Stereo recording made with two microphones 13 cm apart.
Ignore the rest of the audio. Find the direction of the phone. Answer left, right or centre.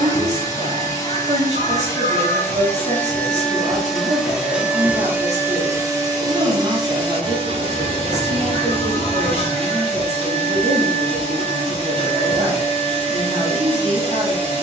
right.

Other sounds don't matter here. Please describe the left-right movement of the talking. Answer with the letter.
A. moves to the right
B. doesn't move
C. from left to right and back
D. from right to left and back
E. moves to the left
B.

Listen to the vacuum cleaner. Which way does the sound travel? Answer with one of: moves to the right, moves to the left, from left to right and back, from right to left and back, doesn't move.
moves to the right.